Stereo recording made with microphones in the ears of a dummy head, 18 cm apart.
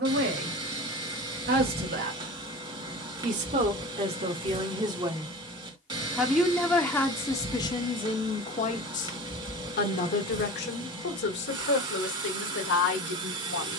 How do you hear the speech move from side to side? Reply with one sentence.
You can hear the speech travel towards the left.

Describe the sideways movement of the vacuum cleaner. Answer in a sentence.
You can hear the vacuum cleaner stay put.